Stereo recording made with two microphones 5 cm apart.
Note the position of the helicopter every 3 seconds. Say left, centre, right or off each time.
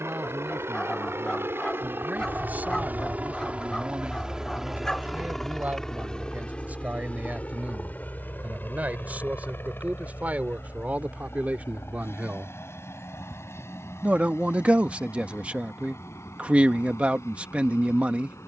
right, centre, left, left, left, left.